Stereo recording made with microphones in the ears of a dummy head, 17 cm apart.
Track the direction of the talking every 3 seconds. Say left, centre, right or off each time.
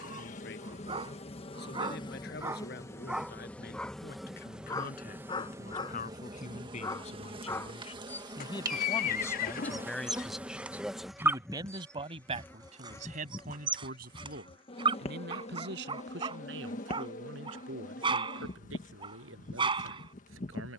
left, left, left, centre, right, right, right.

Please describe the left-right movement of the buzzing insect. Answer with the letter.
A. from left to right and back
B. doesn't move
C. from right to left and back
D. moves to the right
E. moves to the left
A.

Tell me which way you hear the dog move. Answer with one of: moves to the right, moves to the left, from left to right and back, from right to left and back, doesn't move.
from right to left and back.